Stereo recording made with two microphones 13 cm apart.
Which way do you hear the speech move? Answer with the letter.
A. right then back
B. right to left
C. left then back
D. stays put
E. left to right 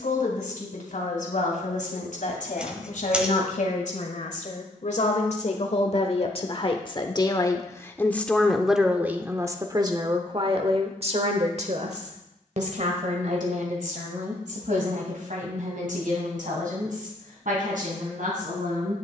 E.